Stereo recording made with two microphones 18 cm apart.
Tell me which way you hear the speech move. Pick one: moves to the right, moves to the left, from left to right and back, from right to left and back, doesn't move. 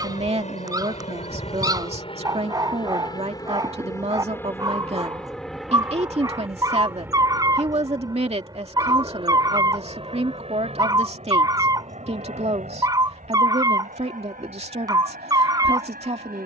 doesn't move.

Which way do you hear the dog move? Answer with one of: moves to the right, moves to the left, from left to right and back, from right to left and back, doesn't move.
doesn't move.